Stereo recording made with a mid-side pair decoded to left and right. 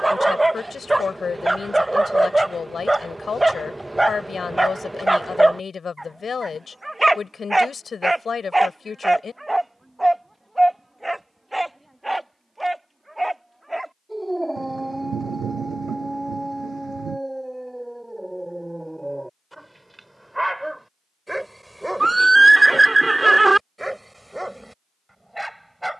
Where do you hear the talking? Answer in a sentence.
You can hear the talking on the left.